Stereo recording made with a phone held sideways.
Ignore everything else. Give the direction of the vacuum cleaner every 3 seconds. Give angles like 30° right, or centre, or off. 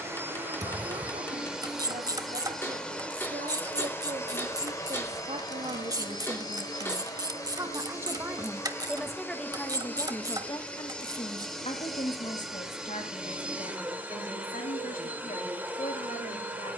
10° right, 20° left, 20° left, 10° left, 10° right, 10° right.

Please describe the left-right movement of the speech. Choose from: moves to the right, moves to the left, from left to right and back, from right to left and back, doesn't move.
moves to the left.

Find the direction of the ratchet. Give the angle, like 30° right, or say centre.
30° right.